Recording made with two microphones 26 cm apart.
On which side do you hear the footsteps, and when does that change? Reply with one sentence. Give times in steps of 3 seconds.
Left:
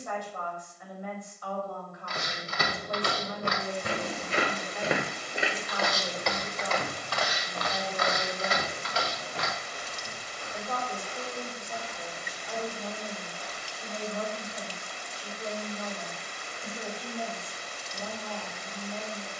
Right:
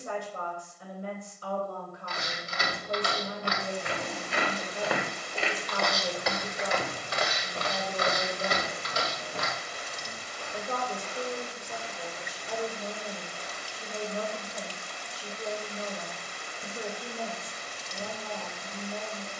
In this clip you hear the footsteps on the left from 0 s, on the right from 6 s and not at all from 15 s.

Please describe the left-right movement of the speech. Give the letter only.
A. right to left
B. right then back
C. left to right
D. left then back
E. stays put
E.